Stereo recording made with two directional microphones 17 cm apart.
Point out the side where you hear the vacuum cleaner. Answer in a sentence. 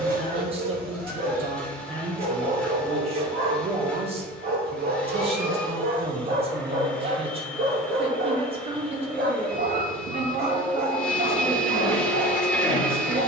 In this clip you hear the vacuum cleaner in the centre.